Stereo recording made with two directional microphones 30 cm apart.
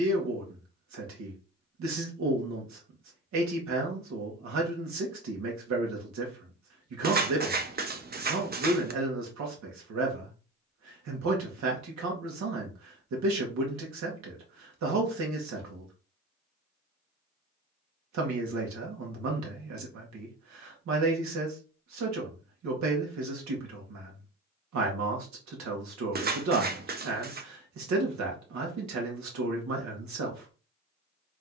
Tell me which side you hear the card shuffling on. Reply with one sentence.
In this clip you hear the card shuffling on the right.